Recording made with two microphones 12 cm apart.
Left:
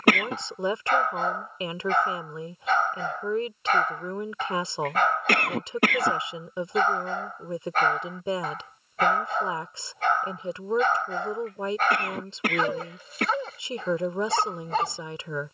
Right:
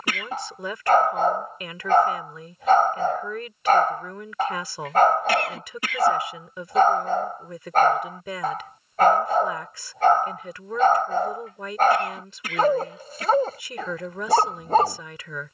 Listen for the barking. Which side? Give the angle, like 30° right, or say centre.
40° right.